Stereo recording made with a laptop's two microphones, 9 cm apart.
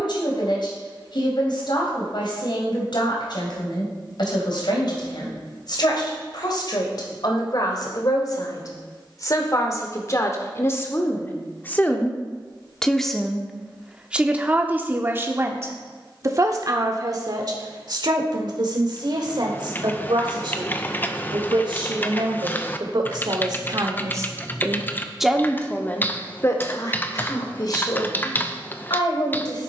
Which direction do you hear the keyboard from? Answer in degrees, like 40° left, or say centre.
20° left.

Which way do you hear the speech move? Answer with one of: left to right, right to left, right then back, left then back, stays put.
right then back.